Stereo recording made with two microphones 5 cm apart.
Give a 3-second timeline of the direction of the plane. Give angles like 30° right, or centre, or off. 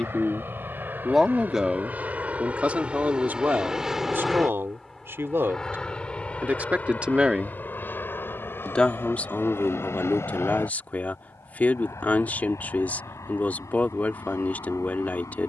40° right, centre, 30° left, 50° left, 60° left.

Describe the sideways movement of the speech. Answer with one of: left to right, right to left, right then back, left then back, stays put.
right then back.